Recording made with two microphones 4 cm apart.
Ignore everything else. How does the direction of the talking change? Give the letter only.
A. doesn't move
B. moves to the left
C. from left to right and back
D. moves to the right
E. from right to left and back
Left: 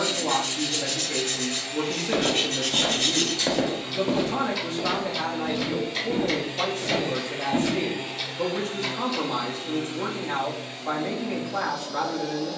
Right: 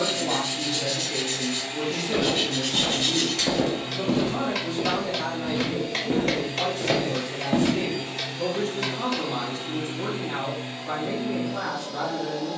A.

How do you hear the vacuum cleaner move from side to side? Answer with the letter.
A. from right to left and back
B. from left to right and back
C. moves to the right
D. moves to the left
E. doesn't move
A.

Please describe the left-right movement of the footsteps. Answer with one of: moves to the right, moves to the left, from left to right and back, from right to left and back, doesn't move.
moves to the right.